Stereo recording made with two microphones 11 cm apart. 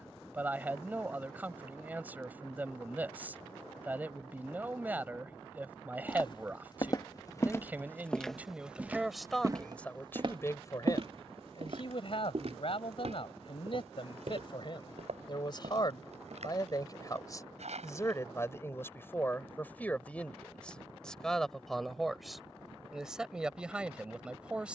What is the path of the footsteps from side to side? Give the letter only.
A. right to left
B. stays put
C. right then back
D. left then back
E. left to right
E.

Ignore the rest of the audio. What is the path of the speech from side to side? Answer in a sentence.
You can hear the speech move from right to left and back again.